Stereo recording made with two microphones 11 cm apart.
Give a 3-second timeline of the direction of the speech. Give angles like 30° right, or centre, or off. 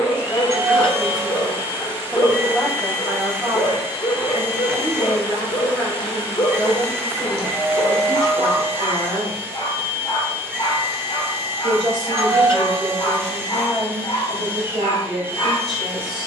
centre, 30° right, 50° right, 50° right, 50° right, 50° right.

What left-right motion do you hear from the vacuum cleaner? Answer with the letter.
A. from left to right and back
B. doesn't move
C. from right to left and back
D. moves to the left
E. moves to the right
B.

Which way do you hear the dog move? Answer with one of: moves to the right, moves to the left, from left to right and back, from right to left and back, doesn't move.
doesn't move.